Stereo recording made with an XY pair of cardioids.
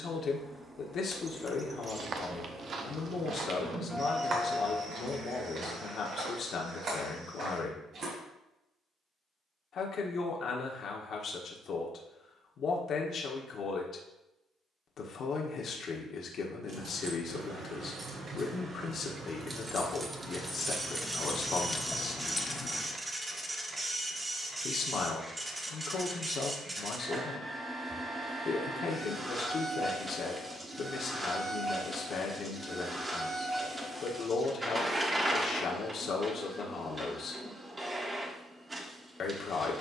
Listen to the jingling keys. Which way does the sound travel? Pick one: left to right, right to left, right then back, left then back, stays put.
right to left.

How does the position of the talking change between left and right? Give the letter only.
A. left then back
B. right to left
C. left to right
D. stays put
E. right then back
D.